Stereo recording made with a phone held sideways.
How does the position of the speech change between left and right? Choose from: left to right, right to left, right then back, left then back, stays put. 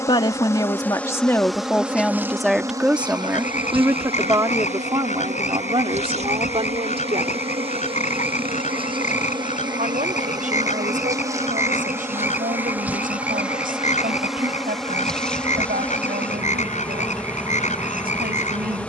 left to right.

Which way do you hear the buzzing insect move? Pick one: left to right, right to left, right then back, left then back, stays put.
right then back.